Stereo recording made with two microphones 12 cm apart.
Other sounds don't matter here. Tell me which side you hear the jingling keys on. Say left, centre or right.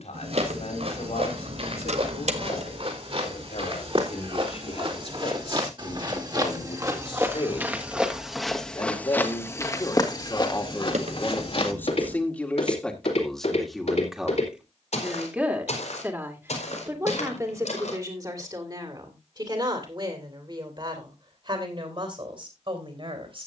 right.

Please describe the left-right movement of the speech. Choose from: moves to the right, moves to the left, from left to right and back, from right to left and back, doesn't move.
moves to the right.